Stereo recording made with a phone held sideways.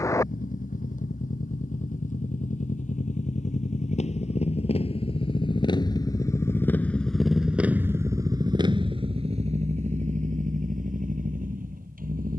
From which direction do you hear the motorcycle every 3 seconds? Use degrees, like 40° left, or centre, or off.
60° left, 40° left, 10° right, 50° right.